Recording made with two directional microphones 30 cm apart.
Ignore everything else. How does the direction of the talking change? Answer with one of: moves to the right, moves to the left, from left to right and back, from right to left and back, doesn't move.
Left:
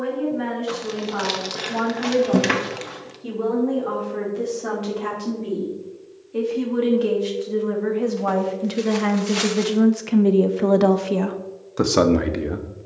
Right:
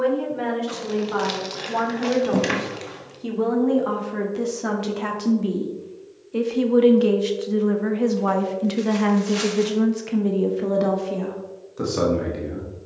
moves to the left.